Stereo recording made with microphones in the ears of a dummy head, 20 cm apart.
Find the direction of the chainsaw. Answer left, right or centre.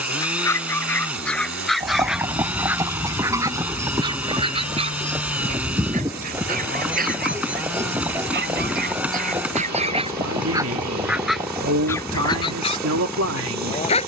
centre.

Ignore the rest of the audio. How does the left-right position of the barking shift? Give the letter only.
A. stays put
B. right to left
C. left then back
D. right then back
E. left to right
D.